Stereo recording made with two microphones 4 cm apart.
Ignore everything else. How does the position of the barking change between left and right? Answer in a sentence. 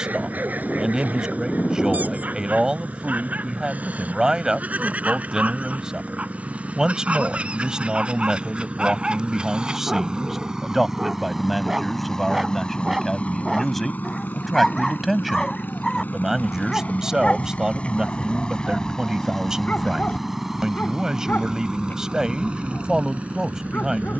In this clip you hear the barking move to the left.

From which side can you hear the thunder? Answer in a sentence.
You can hear the thunder on the left.